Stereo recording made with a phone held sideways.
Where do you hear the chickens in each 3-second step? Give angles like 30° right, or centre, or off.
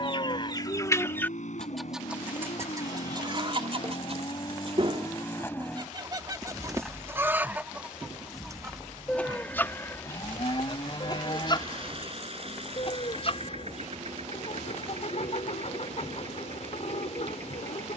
10° left, 40° right, 20° right, 20° left, 50° left, 50° left.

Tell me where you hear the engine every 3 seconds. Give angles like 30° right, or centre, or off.
60° left, 30° left, 10° right, 40° right, 50° right, 50° right.